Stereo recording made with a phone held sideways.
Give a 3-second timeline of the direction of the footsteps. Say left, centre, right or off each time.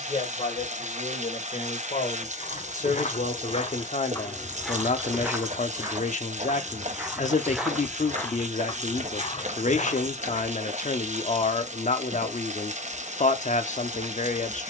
left, centre, centre, left, off.